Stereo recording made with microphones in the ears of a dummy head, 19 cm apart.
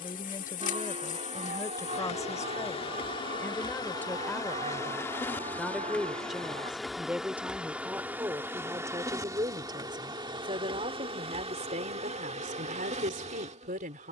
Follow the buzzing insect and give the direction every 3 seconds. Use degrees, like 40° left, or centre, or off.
30° left, 20° left, centre, 20° right, 30° right.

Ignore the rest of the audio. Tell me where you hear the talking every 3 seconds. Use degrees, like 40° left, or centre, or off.
10° left, 10° left, 10° right, 20° right, 40° right.